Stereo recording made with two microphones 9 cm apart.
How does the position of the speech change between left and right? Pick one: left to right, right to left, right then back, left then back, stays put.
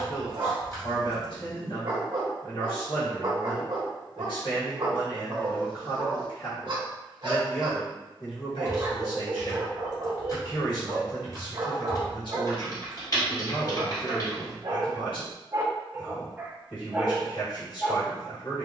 stays put.